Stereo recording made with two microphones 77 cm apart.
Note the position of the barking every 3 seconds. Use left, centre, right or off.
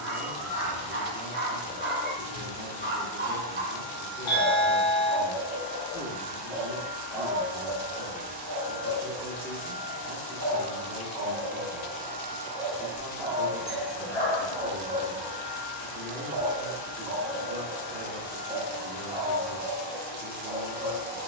right, right, centre, left, left, left, left.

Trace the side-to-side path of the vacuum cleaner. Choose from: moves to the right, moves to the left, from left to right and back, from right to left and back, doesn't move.
from left to right and back.